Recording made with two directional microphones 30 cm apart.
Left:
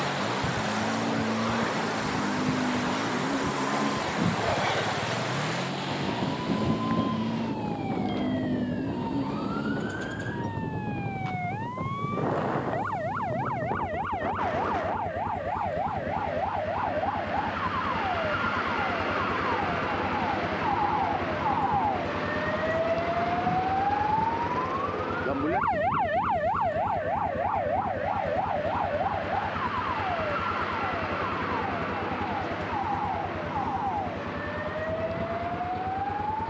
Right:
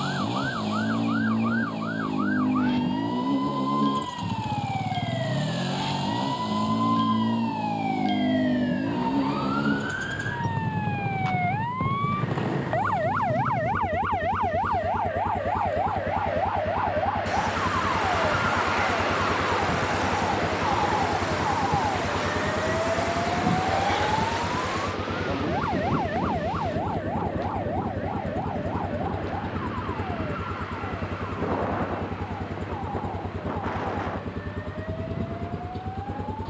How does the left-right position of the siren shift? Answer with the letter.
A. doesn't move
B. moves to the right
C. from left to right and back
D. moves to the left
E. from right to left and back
D.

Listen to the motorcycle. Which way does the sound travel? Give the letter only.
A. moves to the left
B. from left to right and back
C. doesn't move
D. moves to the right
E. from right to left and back
C.